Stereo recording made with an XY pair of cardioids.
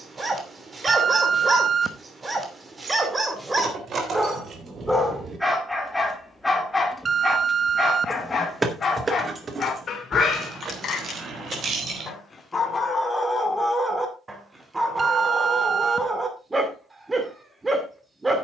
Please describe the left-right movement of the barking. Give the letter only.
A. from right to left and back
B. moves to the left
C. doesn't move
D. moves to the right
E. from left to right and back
A.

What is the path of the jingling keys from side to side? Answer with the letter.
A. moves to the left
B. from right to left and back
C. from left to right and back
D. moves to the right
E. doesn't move
B.